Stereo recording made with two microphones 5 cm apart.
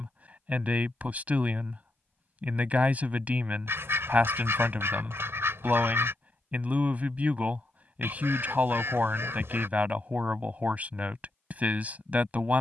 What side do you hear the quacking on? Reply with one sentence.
You can hear the quacking on the right.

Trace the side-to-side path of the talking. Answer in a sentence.
In this clip you hear the talking stay in one place.